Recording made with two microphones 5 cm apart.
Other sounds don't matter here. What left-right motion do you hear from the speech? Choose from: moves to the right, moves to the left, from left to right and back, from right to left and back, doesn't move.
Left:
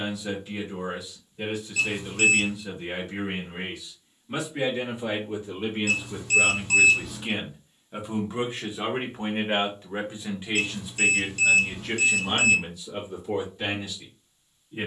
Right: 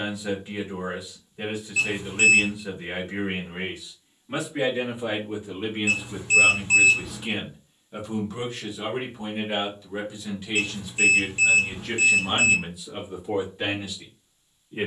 from right to left and back.